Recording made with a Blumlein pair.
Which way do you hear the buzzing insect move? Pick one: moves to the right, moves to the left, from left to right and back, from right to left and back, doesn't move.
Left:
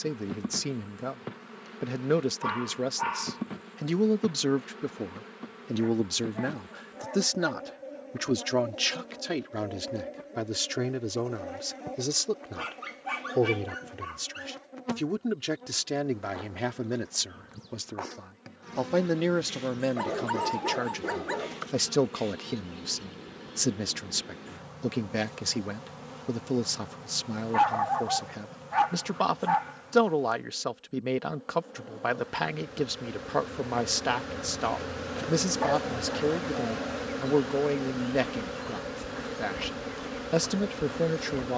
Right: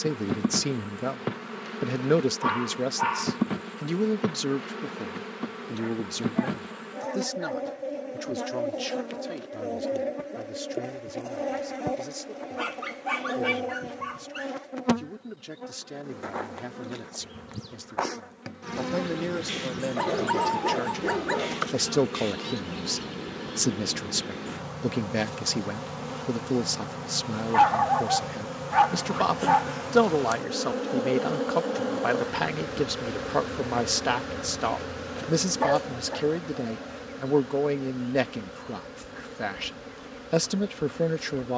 moves to the left.